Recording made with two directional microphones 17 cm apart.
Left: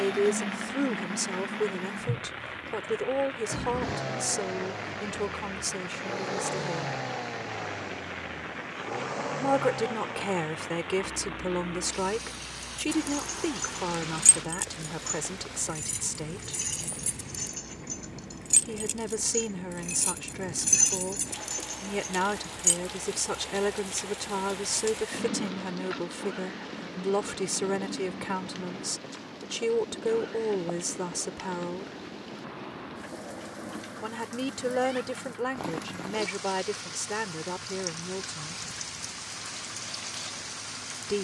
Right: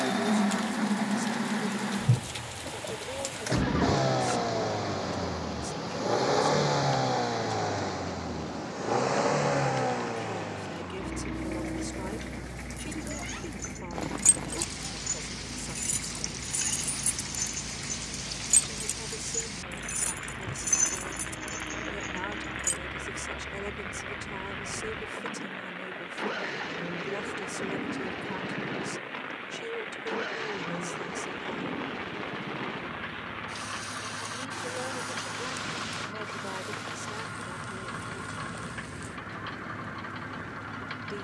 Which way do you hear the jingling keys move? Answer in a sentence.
You can hear the jingling keys go right and come back.